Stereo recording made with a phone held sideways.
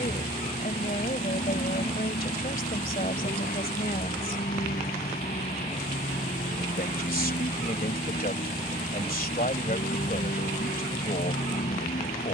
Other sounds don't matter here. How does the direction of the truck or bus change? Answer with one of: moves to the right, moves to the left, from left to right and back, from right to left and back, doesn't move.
doesn't move.